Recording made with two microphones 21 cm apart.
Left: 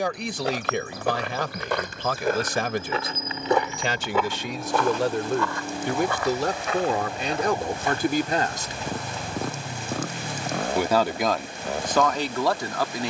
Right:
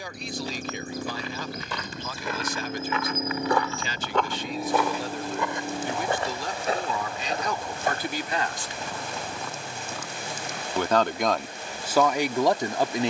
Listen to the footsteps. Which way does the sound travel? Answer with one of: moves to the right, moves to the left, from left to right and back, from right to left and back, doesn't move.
moves to the right.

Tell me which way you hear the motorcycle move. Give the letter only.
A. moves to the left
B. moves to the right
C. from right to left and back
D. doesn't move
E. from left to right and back
A.